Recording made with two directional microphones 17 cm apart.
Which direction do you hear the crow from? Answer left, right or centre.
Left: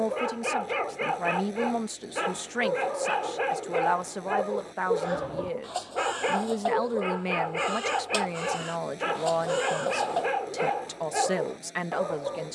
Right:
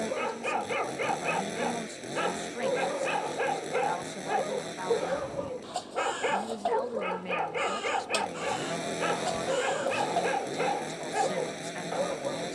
centre.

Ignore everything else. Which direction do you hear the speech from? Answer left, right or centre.
left.